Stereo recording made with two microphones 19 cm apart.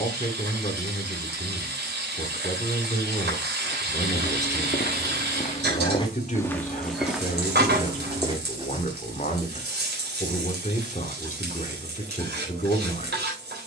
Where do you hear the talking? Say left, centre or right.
left.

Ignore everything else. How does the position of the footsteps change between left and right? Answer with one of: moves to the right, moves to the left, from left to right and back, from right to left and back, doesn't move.
moves to the right.